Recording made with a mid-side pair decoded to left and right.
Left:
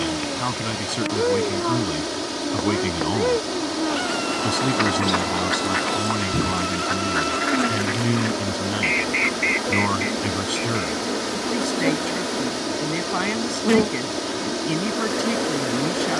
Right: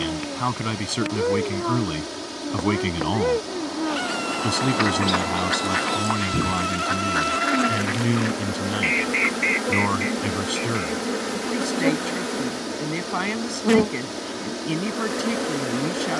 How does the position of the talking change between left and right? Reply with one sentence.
You can hear the talking travel towards the left.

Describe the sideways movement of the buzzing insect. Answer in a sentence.
In this clip you hear the buzzing insect move from left to right and back again.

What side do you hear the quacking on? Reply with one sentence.
You can hear the quacking in the centre.